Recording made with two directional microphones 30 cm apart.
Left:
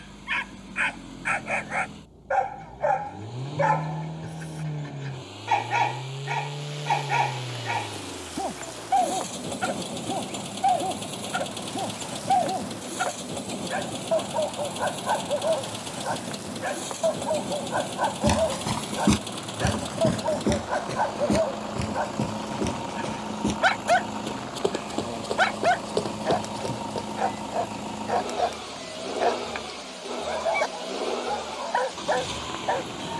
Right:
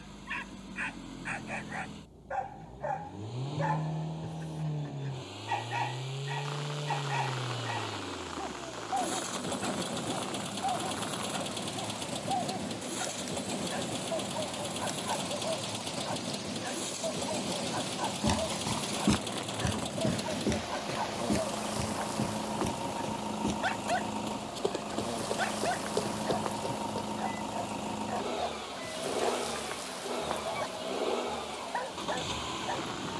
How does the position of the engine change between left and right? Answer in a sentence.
In this clip you hear the engine stay in one place.